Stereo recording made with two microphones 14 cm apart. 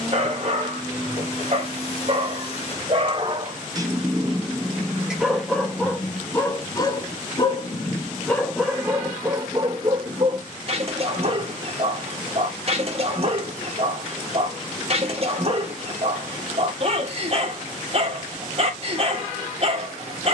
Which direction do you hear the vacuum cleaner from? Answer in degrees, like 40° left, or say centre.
40° left.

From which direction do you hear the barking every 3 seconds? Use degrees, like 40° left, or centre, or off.
40° right, 10° right, 20° left, 30° right, 40° right, 40° right, 40° right.